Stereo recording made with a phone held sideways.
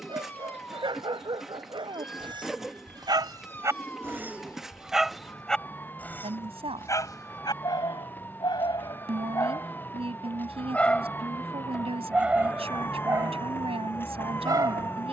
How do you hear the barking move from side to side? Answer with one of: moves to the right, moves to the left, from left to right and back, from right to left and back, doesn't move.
from right to left and back.